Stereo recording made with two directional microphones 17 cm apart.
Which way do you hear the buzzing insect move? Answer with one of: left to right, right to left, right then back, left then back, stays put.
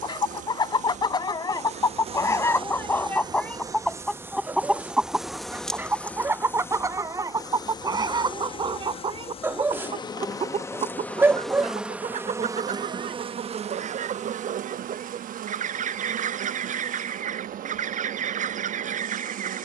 left then back.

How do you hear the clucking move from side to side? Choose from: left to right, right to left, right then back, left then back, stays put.
left to right.